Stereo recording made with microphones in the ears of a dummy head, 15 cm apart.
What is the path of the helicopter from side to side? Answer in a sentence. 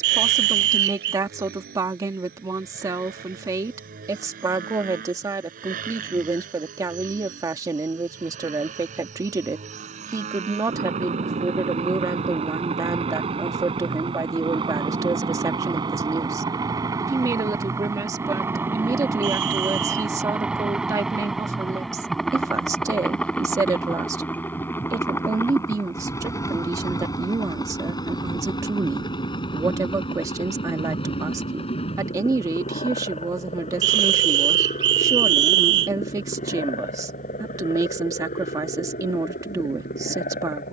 You can hear the helicopter move to the left.